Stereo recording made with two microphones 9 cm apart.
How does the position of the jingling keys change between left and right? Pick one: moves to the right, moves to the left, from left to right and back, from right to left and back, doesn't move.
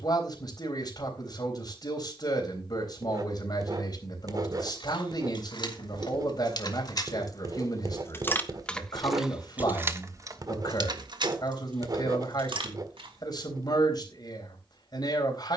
moves to the right.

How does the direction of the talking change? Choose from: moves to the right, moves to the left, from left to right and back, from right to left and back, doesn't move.
doesn't move.